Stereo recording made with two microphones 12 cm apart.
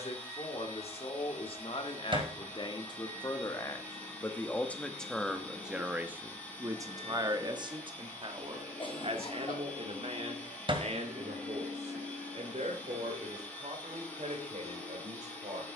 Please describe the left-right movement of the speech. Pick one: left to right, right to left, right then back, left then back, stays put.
left to right.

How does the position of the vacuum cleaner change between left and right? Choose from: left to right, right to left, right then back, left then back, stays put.
stays put.